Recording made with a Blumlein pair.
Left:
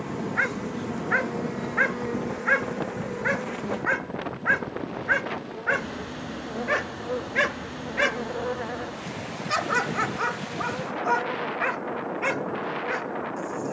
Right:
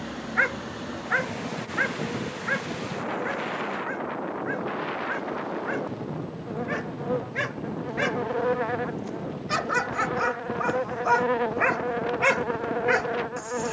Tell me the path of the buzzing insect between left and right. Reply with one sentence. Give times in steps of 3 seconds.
In this clip you hear the buzzing insect on the left from 0 s, in the centre from 3 s and on the right from 9 s.